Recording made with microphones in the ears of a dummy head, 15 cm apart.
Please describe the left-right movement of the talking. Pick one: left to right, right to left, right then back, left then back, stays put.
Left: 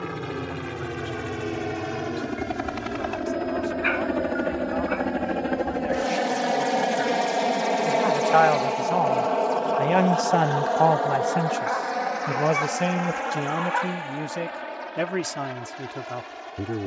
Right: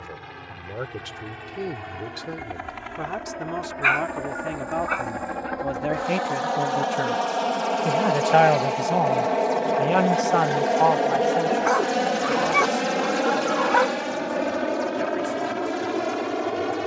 right to left.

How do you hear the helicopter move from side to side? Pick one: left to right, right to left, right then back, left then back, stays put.
left to right.